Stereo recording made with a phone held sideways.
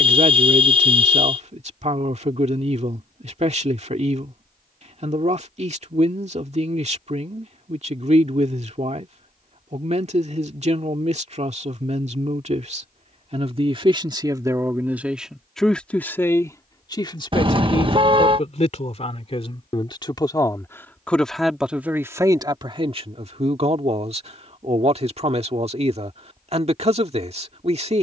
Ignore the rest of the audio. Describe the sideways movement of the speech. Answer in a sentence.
You can hear the speech go left and come back.